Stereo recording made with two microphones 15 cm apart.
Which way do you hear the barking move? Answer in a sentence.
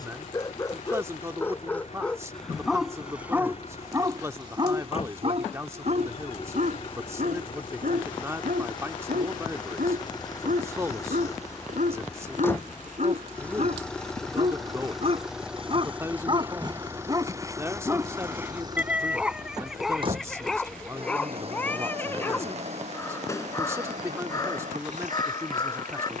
You can hear the barking go right and come back.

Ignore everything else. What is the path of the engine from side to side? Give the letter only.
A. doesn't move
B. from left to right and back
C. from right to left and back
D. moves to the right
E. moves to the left
D.